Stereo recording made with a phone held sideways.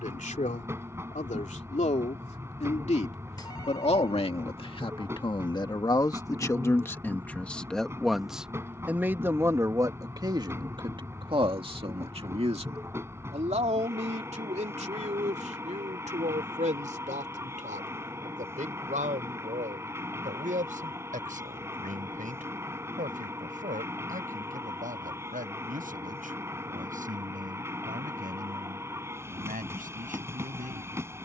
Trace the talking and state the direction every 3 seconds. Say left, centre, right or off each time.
left, left, centre, right, right, right, right, right, right, right, right.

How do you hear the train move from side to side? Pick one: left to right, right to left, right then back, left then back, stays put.
stays put.